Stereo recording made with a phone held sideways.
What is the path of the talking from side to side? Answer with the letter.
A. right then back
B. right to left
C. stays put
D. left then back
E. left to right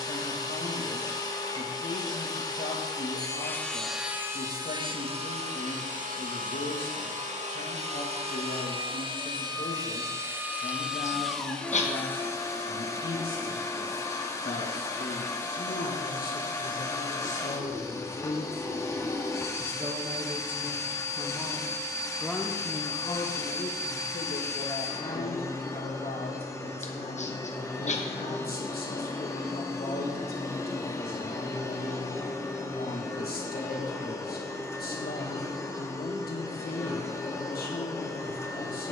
A.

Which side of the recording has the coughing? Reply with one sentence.
You can hear the coughing on the left.